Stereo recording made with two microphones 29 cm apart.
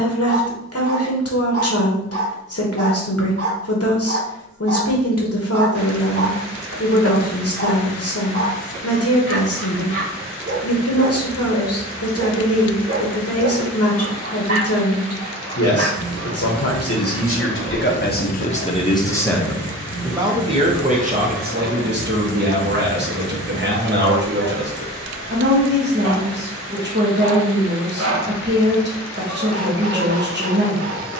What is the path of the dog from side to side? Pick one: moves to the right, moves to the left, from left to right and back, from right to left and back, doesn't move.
doesn't move.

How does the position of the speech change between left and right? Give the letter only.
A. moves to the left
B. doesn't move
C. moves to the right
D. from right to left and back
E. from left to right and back
C.